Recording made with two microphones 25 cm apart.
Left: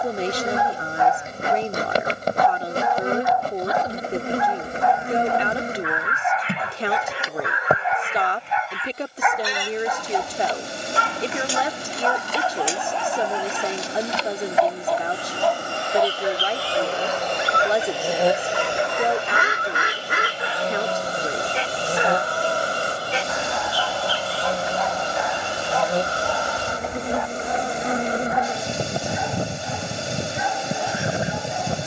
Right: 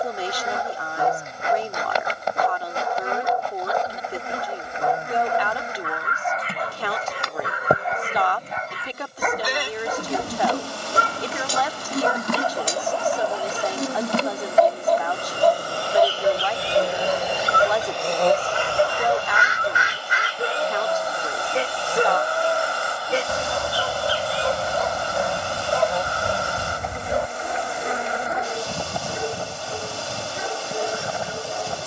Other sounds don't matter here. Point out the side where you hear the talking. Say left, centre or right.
left.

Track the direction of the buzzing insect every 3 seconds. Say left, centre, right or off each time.
left, left, centre, right, right, right, left, left, left, left, left.